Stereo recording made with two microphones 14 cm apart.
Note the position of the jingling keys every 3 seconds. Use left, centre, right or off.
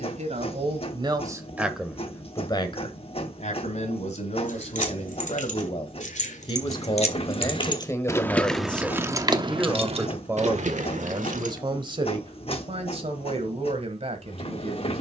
off, left, left, right, off.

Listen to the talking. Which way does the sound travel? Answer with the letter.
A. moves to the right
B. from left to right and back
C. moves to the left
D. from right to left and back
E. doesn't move
D.